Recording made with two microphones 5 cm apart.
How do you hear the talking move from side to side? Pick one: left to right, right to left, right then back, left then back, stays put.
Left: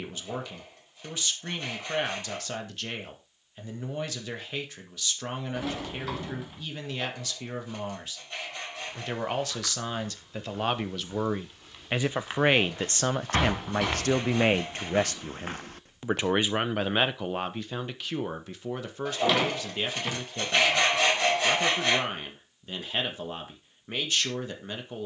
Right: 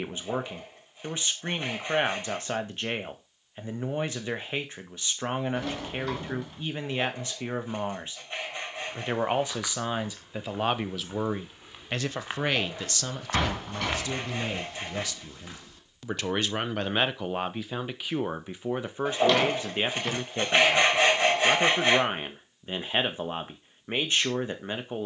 left then back.